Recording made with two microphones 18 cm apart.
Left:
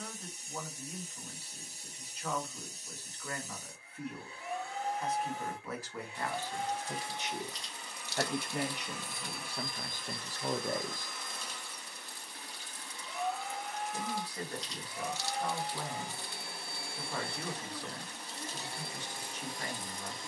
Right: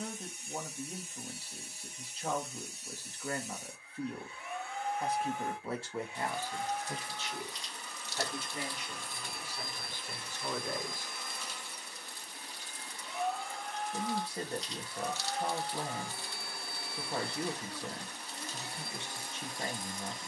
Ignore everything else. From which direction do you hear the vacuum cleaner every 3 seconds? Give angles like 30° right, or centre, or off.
40° left, 40° left, 20° left, 10° right, centre, 20° left, 30° left.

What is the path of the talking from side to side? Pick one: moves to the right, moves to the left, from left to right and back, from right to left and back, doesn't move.
from right to left and back.